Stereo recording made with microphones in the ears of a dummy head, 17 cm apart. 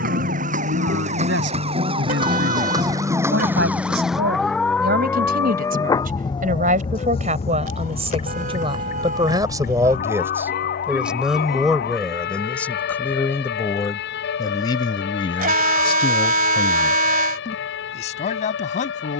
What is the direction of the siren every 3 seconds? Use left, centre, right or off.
right, centre, left, left, left, left, left.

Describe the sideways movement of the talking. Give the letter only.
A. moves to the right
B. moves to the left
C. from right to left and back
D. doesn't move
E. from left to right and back
B.